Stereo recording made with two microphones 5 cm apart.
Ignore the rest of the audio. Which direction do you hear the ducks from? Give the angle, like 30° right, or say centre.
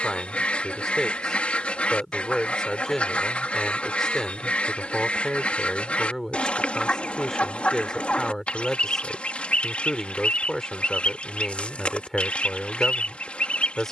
30° left.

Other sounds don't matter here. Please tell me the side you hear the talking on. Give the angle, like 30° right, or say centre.
10° left.